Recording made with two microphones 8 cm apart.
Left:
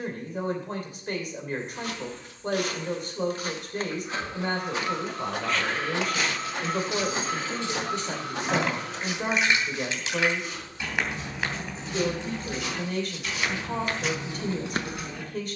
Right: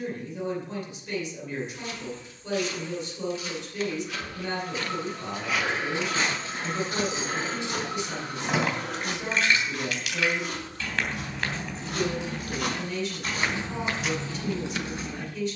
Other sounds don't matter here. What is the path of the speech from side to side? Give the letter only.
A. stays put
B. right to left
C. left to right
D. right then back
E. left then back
A.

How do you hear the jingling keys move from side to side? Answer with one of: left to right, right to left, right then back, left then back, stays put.
left then back.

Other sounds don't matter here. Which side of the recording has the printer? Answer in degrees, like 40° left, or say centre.
80° left.